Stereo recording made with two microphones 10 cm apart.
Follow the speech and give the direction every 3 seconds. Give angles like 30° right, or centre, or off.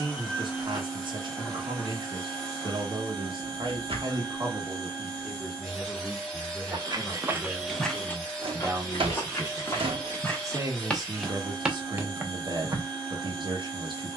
50° right, 30° right, centre, 30° right, 50° right.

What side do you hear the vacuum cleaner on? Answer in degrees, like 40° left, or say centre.
10° left.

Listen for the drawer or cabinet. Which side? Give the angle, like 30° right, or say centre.
80° right.